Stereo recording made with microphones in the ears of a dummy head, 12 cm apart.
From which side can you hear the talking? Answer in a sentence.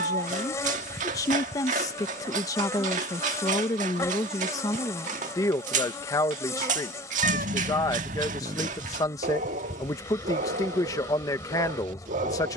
In this clip you hear the talking on the left.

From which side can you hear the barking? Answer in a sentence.
You can hear the barking on the right.